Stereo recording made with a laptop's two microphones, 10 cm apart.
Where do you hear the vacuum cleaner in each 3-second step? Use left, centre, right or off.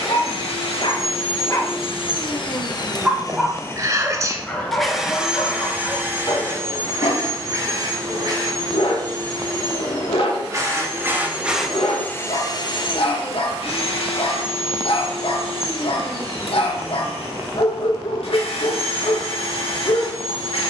left, centre, right, right, left, left, left.